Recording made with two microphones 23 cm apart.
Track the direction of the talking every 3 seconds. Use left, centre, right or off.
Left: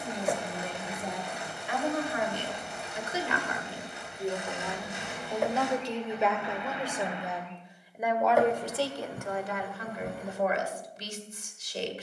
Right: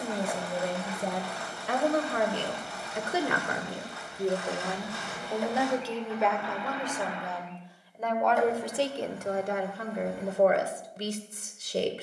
right, right, centre, right.